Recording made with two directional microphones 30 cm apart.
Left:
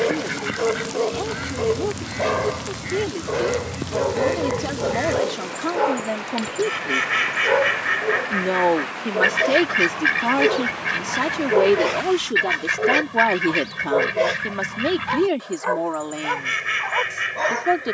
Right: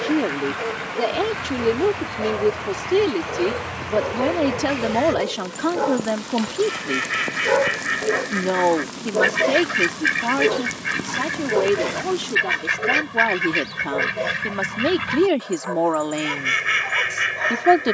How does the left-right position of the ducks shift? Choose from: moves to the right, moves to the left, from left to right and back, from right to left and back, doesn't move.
moves to the right.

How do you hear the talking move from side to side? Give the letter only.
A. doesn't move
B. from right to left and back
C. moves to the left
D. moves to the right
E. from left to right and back
B.